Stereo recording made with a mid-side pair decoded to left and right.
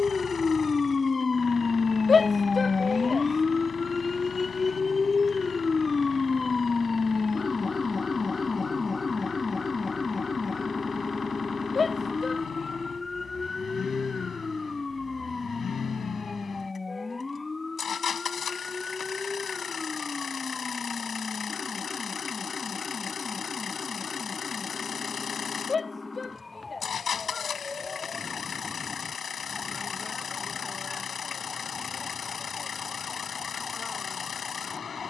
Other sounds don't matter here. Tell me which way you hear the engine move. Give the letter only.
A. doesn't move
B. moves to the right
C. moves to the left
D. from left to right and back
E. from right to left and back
A.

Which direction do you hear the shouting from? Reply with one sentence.
You can hear the shouting on the left.